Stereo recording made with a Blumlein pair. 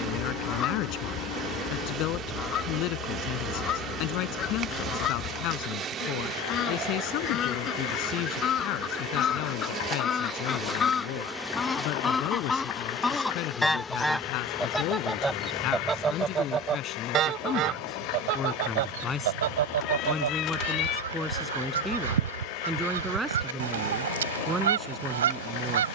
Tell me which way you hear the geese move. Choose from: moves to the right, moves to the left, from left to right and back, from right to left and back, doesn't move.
moves to the right.